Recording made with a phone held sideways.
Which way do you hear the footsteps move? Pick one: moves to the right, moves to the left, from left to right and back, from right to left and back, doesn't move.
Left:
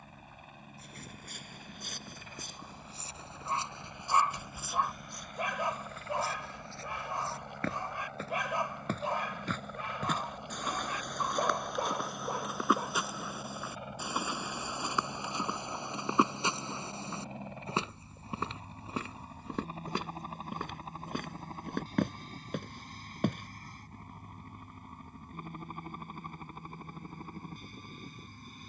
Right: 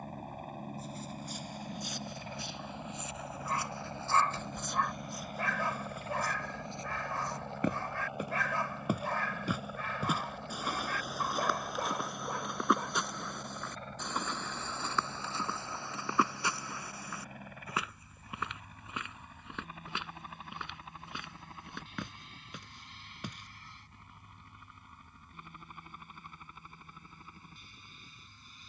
from left to right and back.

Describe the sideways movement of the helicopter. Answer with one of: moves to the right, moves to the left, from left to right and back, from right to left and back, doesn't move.
moves to the left.